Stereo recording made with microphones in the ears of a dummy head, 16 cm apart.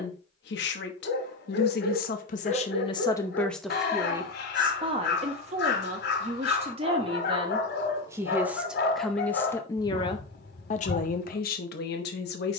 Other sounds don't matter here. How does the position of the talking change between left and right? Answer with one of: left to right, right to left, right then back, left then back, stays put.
right then back.